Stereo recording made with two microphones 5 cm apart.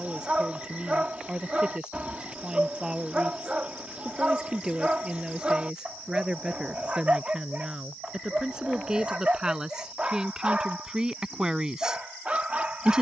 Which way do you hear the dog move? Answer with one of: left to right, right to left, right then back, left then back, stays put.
stays put.